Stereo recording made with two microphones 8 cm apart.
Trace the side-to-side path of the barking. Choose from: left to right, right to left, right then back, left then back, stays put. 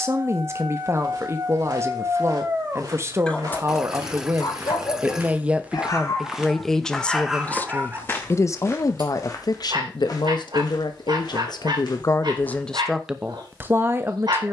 left then back.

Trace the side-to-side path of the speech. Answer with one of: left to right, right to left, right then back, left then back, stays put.
left then back.